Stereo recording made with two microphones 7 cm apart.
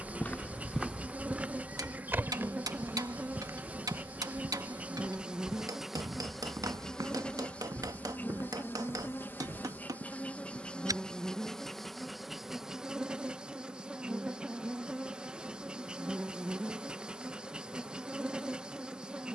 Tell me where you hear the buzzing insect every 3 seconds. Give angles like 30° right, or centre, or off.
20° right, 20° right, 20° left, 20° left, 10° right, 10° right, 10° right.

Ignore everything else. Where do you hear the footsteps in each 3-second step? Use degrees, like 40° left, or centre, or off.
10° right, 40° right, 50° right, 50° right, off, off, off.